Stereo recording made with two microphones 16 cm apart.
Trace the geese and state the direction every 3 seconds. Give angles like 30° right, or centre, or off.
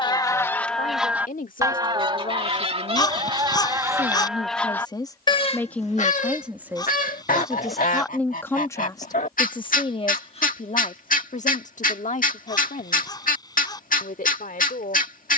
10° right, centre, 60° left, 60° left, 60° left.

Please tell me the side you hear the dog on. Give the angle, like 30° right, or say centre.
30° left.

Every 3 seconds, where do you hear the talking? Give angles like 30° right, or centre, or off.
60° left, 30° left, centre, 40° left, 60° left.